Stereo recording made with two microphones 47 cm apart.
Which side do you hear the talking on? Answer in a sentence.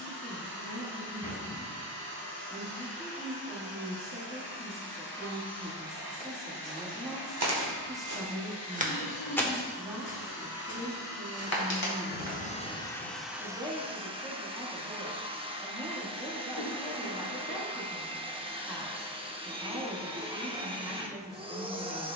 You can hear the talking in the centre.